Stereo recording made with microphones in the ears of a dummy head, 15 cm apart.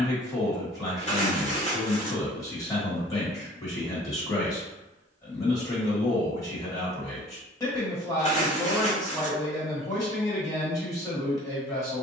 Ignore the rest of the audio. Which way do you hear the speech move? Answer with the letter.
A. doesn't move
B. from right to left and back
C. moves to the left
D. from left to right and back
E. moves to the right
A.